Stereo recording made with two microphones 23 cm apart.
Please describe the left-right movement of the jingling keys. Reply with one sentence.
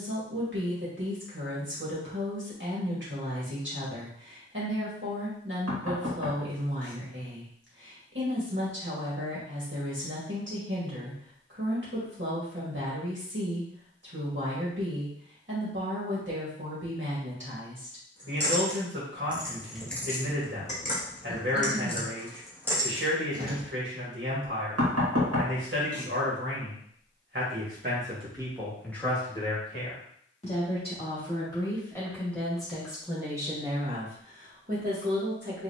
You can hear the jingling keys go left and come back.